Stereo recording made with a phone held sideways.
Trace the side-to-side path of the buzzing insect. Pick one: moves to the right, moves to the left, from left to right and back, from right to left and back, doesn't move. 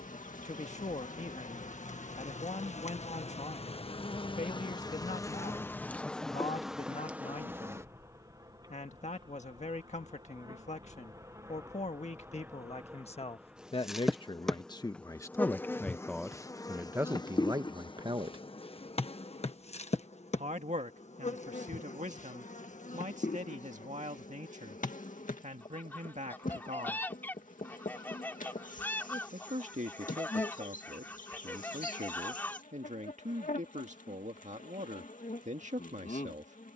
from left to right and back.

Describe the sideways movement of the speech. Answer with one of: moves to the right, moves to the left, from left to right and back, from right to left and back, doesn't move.
moves to the right.